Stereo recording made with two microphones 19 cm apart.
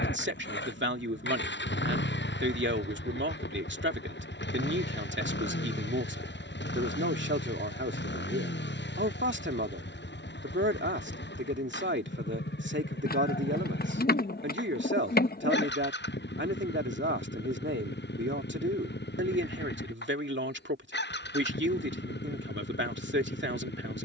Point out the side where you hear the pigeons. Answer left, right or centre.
left.